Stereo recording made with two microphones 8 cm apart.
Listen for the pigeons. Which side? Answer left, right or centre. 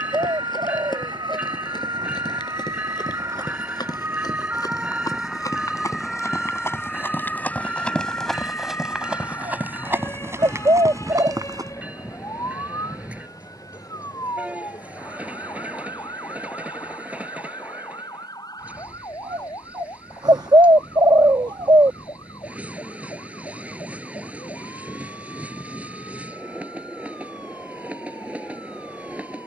right.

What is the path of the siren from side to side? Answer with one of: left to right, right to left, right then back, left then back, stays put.
right to left.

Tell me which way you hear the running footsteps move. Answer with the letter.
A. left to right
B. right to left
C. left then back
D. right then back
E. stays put
A.